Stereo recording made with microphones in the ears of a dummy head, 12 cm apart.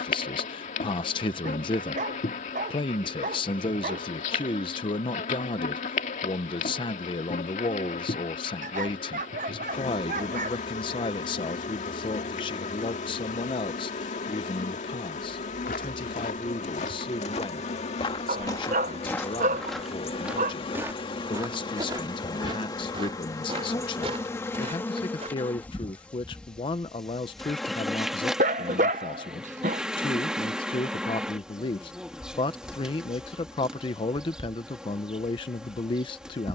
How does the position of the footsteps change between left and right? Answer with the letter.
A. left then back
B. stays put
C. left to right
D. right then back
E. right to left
C.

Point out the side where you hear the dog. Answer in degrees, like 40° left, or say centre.
60° right.